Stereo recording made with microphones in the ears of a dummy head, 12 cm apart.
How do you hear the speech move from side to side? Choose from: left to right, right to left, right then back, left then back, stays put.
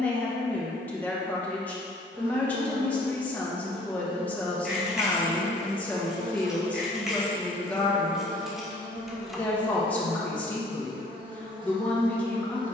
stays put.